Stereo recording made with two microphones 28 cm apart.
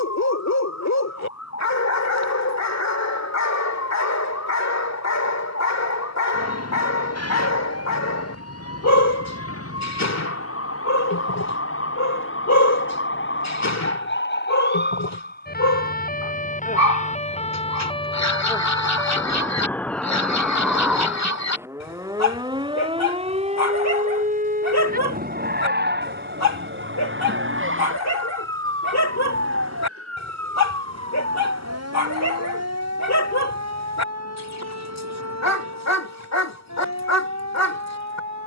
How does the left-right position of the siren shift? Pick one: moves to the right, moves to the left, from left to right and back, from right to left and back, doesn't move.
moves to the right.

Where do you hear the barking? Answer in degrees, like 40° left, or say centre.
70° left.